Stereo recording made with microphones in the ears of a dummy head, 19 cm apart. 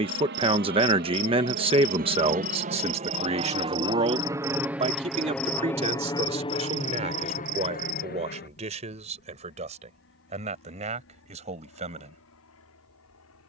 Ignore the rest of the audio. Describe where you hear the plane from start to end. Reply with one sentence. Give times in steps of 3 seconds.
In this clip you hear the plane on the right from 0 s, in the centre from 3 s and on the left from 6 s.